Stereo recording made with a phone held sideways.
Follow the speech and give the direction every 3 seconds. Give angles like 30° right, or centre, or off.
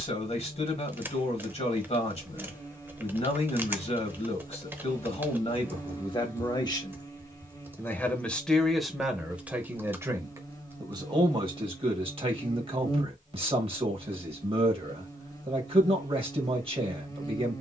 50° left, 40° left, 20° left, 20° right, 40° right, 40° right.